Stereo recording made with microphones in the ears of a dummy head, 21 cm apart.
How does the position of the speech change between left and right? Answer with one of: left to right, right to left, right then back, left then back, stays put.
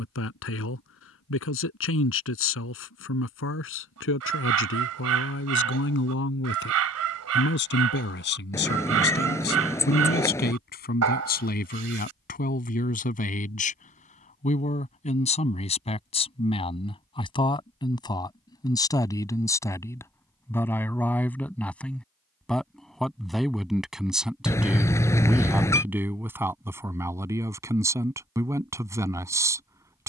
left to right.